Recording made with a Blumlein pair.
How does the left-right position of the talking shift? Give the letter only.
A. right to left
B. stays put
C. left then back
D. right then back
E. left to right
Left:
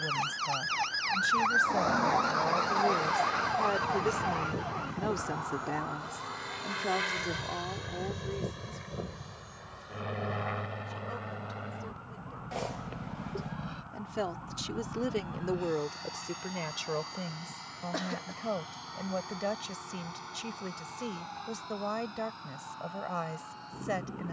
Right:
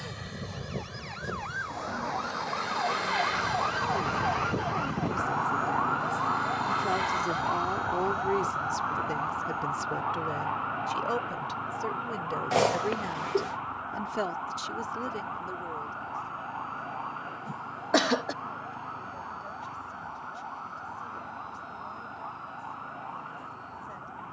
D.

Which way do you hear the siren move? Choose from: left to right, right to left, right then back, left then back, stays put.
left to right.